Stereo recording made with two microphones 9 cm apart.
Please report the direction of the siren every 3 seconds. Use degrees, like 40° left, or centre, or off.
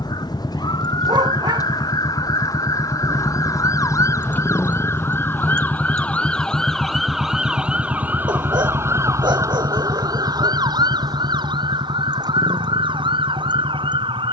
50° left, 30° left, 10° right, 50° right, 70° right.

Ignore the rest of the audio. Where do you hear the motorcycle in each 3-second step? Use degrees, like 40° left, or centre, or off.
50° left, 20° left, 20° right, 40° right, 50° right.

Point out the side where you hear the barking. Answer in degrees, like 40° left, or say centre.
60° right.